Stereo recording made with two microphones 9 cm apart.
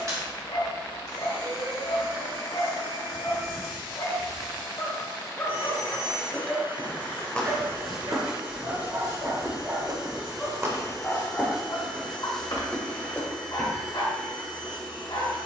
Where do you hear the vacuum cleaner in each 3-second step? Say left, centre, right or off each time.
right, right, right, centre, centre.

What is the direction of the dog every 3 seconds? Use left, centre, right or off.
left, left, right, centre, left.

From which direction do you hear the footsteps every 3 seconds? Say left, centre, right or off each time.
off, off, centre, right, centre.